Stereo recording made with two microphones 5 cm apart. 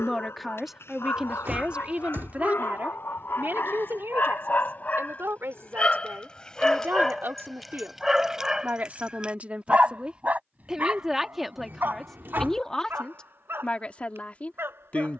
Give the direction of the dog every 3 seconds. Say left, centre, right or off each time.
left, left, centre, right, right.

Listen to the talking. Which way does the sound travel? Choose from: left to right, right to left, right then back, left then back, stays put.
right then back.